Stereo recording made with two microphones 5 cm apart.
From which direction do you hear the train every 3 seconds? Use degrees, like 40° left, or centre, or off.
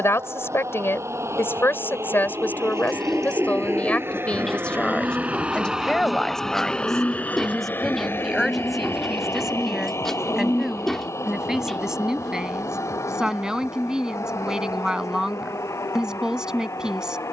70° right, 40° right, 30° left, 70° left, 80° left, 80° left.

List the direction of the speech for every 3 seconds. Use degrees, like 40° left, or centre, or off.
50° left, 20° left, centre, 10° right, 10° right, 10° right.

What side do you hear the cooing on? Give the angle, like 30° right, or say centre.
10° left.